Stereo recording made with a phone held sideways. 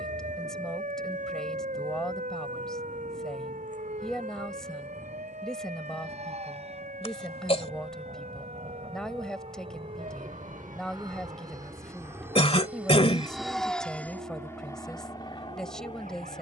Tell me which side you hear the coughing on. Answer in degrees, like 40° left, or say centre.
50° left.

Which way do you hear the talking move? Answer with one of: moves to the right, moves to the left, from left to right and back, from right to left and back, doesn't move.
doesn't move.